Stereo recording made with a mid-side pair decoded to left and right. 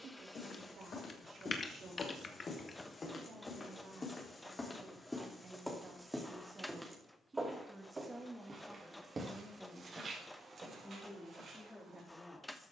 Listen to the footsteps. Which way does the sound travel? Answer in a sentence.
You can hear the footsteps move to the right.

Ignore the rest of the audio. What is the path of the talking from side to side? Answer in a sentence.
You can hear the talking go from the right side to the left.